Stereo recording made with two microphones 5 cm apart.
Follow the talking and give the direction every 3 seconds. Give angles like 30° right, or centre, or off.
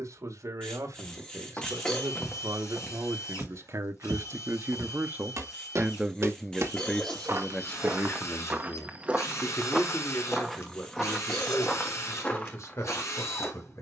70° right, 50° right, 20° left, 50° left, 60° left.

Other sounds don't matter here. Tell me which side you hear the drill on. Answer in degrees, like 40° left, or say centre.
60° left.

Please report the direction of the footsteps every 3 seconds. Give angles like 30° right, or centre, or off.
20° left, 60° right, 40° right, centre, 30° left.